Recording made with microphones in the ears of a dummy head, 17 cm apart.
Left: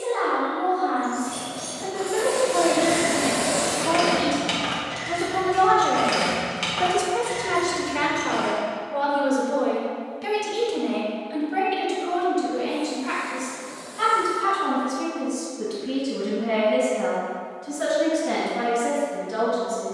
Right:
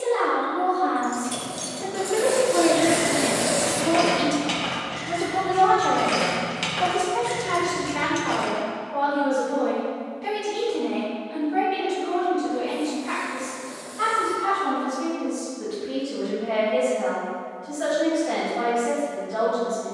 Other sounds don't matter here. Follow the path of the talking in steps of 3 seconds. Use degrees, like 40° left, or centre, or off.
50° right, 10° right, 30° left, 60° left, 70° left, 70° left, 80° left.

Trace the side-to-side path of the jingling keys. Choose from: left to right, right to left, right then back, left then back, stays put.
left then back.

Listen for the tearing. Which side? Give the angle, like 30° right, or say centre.
20° right.